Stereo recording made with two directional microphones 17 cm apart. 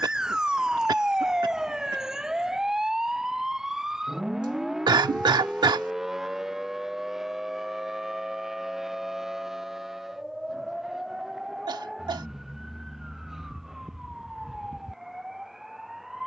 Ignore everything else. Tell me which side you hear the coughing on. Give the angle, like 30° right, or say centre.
20° right.